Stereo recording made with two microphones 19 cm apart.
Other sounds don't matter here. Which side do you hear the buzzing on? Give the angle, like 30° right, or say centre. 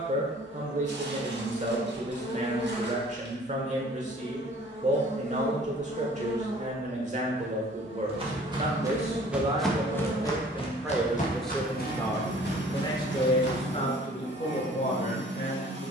70° left.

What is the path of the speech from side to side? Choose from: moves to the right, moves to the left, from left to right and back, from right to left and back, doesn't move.
moves to the left.